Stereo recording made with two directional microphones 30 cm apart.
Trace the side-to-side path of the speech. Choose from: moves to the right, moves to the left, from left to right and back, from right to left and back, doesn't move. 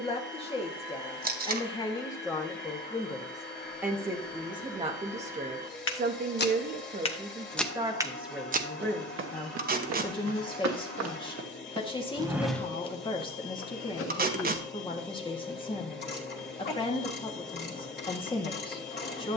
from left to right and back.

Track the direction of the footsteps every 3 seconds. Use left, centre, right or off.
off, left, centre, right, left, off, off.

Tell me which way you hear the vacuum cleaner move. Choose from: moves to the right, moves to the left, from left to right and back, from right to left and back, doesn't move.
doesn't move.